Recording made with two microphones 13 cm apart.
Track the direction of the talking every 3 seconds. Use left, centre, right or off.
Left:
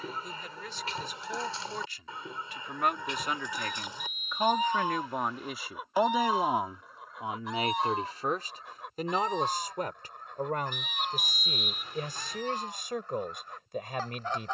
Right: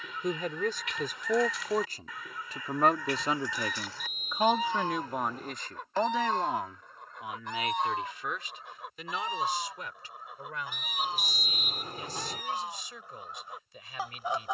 right, centre, left, left, left.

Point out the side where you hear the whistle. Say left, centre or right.
right.